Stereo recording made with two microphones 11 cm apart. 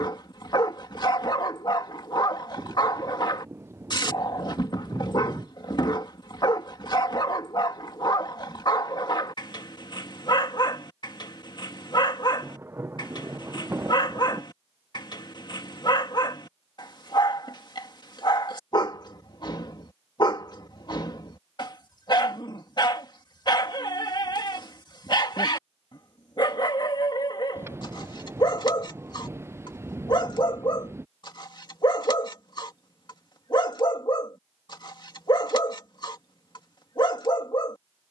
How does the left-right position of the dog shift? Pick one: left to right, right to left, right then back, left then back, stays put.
stays put.